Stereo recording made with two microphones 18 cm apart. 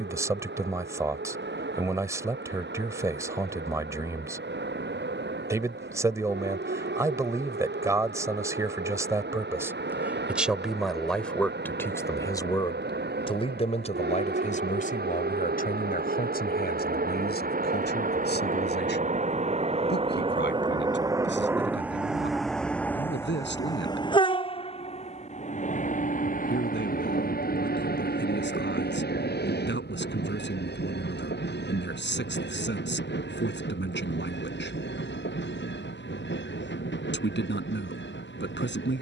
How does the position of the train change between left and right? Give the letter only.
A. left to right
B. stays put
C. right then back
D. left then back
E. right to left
E.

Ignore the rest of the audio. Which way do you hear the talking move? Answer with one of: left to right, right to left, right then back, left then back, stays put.
right to left.